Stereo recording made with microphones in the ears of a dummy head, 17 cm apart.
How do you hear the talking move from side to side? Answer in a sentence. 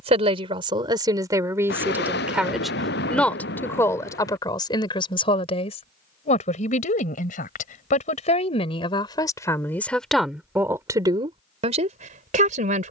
You can hear the talking go left and come back.